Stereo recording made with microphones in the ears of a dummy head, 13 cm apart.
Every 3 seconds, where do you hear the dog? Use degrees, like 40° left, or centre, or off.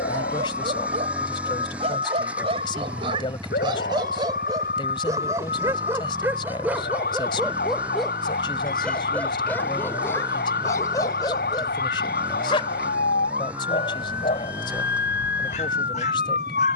40° right, 30° right, 10° right, 20° left, 40° left, 50° left.